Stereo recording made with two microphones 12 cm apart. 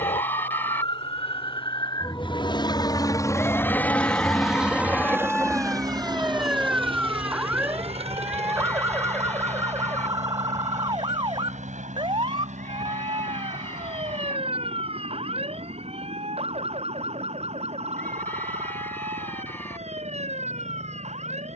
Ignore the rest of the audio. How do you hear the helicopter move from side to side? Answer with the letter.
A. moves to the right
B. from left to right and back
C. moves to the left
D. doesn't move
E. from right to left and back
A.